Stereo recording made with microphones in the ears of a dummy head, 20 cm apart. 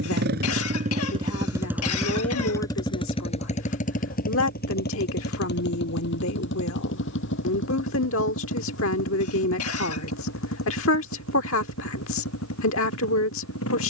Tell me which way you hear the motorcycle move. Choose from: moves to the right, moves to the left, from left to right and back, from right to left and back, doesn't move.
moves to the left.